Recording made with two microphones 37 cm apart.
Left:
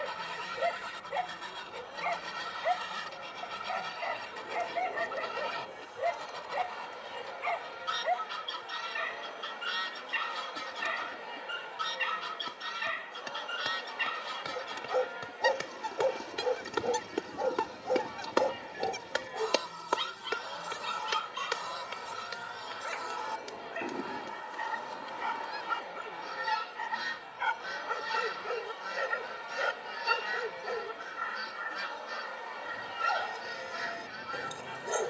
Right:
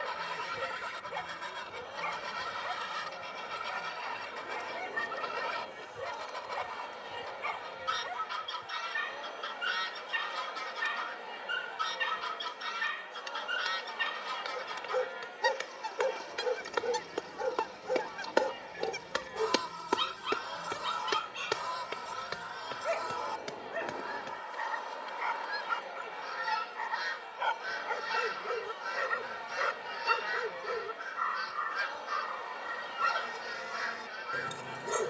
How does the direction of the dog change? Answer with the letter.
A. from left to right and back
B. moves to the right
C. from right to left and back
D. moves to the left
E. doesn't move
C.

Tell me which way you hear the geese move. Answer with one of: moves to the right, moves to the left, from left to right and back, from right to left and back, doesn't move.
doesn't move.